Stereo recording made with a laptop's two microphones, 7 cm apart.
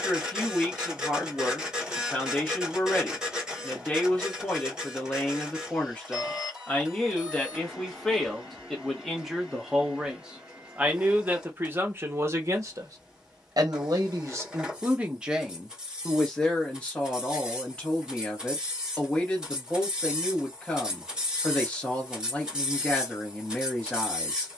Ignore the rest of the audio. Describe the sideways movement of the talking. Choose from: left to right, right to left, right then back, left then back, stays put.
right then back.